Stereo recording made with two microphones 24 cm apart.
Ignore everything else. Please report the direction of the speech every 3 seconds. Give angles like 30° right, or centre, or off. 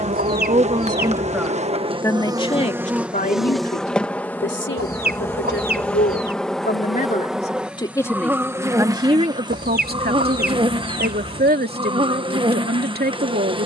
centre, 50° left, 20° left, 40° right, 40° right.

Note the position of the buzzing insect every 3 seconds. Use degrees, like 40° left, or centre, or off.
20° right, centre, centre, 20° right, 20° right.